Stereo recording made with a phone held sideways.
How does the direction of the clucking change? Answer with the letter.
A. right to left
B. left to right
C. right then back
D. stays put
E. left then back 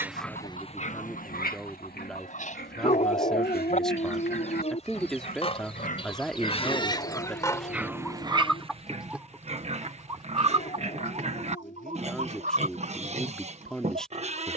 B.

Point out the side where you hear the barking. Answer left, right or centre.
left.